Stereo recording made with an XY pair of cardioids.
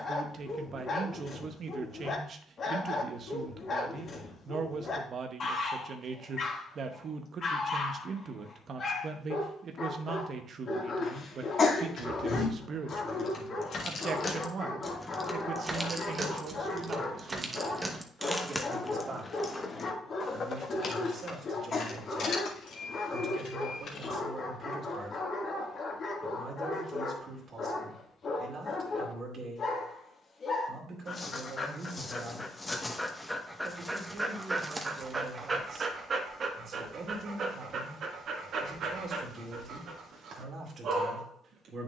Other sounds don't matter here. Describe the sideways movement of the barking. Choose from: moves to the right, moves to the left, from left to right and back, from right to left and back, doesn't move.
moves to the right.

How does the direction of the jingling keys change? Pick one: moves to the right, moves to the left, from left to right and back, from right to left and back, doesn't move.
from left to right and back.